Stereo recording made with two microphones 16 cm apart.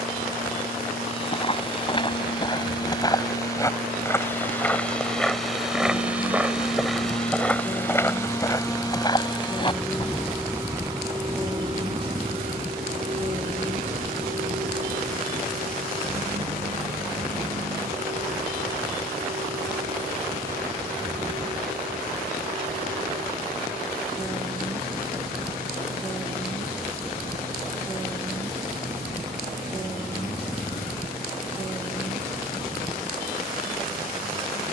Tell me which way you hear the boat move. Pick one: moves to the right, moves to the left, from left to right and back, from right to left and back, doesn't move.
moves to the right.